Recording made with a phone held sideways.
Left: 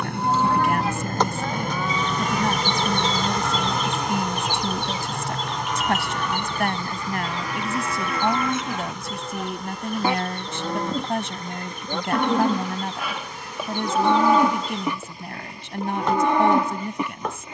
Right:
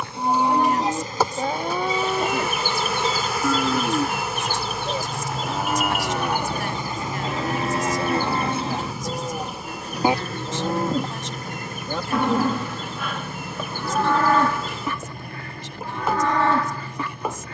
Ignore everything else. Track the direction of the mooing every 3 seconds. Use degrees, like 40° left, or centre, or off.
40° right, 60° right, 40° right, 20° right, 10° left, 20° left.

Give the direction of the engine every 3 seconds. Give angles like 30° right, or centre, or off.
50° left, 10° left, 20° right, 40° right, 50° right, 60° right.